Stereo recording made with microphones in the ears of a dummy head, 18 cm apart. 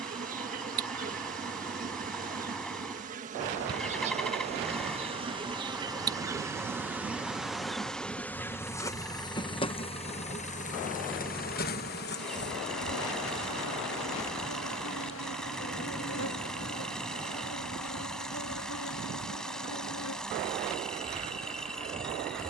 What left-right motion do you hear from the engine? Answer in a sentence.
You can hear the engine stay put.